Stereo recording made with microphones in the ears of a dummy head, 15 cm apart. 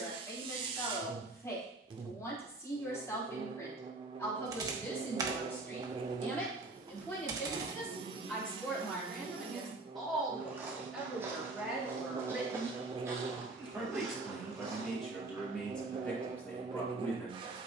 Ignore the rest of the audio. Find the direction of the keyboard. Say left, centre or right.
right.